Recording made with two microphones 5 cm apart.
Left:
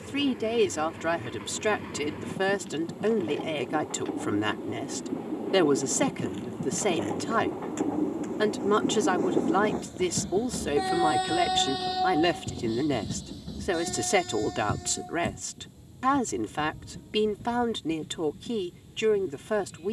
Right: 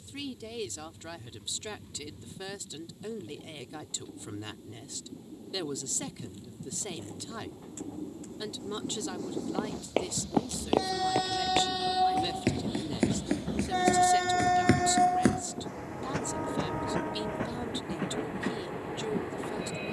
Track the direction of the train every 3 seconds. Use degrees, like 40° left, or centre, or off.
70° left, 60° left, 50° left, 20° left, 30° right, 70° right, 80° right.